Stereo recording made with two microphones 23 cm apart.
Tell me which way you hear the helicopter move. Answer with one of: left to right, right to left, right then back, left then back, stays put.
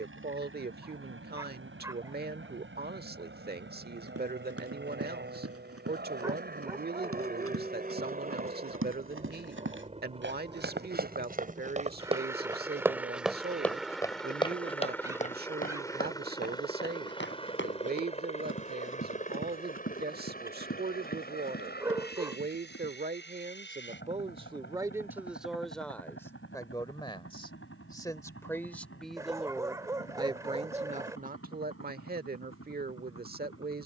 right to left.